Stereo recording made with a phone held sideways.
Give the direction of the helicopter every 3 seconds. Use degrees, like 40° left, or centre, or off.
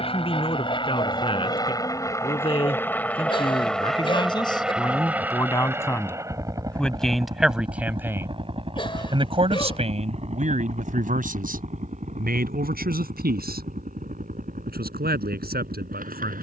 30° left, centre, 30° right, 40° right, 50° right, 60° right.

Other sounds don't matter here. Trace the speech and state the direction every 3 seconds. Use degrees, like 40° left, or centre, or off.
40° left, 30° left, centre, 50° right, 80° right, 80° right.